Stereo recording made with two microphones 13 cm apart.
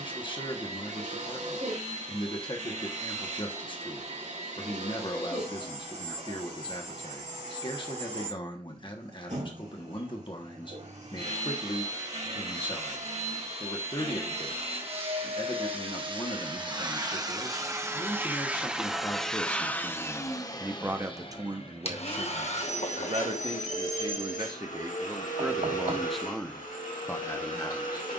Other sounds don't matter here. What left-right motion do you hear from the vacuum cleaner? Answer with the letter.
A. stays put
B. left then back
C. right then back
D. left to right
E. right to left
E.